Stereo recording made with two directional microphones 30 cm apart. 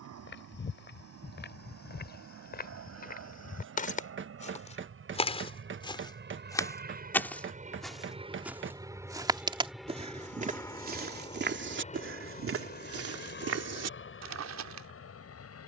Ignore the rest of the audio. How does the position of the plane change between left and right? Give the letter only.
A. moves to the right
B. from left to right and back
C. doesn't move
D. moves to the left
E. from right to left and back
D.